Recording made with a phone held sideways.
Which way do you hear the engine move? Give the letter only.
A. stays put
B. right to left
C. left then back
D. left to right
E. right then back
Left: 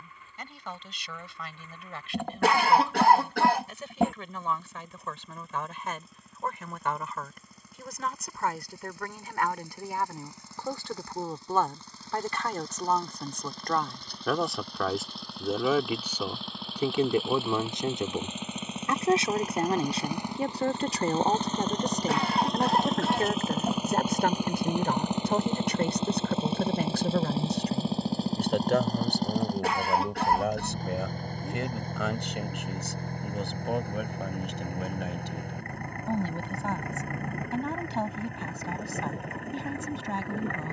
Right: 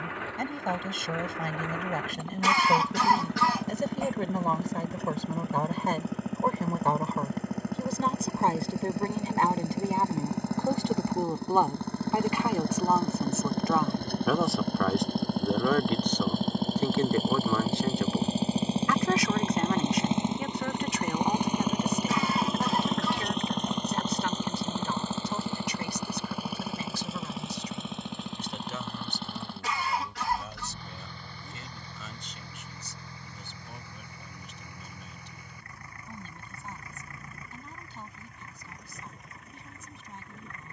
B.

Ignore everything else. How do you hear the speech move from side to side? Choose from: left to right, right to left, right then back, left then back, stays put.
right to left.